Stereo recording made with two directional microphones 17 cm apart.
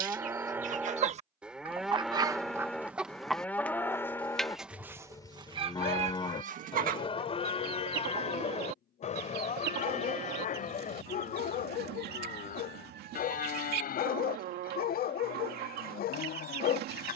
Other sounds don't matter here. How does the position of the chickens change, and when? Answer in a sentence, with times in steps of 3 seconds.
In this clip you hear the chickens on the right from 0 s, in the centre from 3 s and on the right from 6 s.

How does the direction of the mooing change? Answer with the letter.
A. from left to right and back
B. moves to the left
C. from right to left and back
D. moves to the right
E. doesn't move
B.